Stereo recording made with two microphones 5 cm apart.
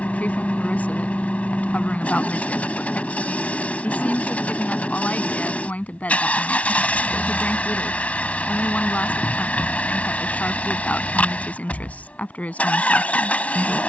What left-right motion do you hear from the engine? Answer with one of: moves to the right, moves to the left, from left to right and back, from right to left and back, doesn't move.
doesn't move.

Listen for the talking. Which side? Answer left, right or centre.
left.